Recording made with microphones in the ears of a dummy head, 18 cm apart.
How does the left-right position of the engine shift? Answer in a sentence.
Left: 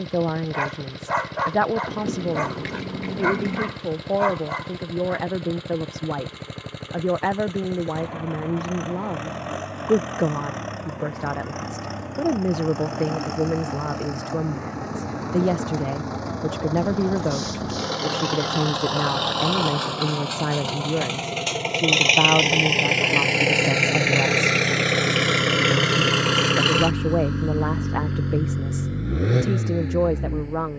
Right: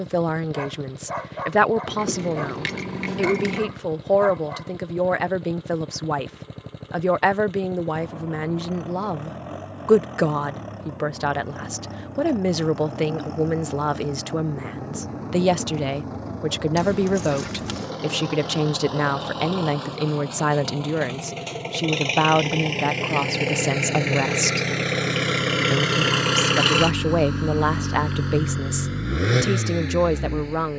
You can hear the engine go from the left side to the right.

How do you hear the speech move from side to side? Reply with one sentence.
You can hear the speech stay in one place.